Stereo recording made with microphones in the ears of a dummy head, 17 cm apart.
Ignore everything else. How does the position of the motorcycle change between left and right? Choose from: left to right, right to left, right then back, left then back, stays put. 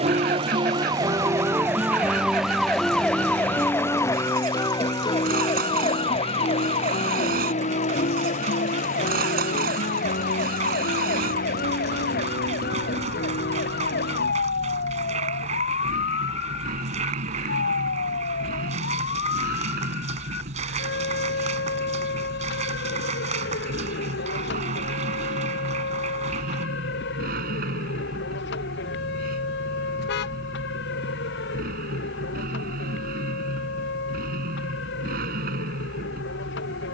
stays put.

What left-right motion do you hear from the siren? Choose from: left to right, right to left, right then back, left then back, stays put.
right to left.